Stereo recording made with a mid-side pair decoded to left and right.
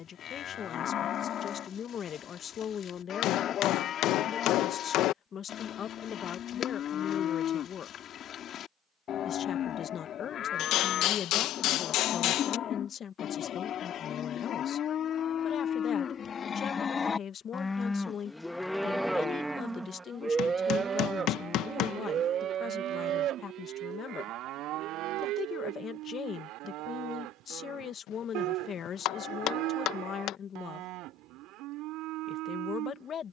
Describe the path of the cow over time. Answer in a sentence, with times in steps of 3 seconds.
You can hear the cow on the left from 0 s, in the centre from 18 s and on the right from 21 s.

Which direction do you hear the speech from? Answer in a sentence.
You can hear the speech on the left.